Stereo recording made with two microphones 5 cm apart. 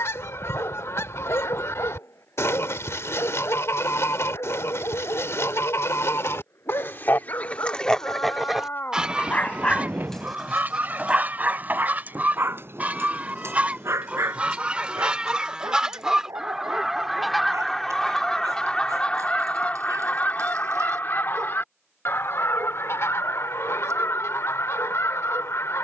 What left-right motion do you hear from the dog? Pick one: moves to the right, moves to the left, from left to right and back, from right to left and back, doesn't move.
moves to the right.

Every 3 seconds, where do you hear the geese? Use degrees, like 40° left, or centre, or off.
60° left, 60° left, 30° left, 30° right, 30° right, 10° right, 30° left, 60° left, 60° left.